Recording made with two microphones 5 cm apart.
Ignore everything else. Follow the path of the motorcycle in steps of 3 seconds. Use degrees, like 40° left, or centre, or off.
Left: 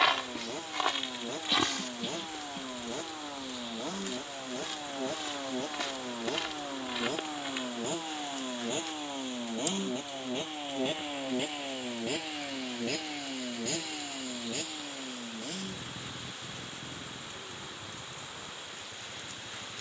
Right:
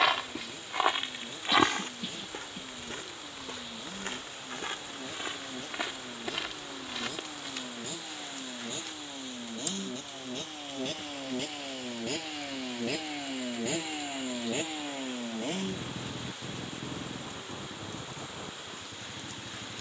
60° left, 50° left, 40° left, 20° left, 10° right, 50° right, 60° right.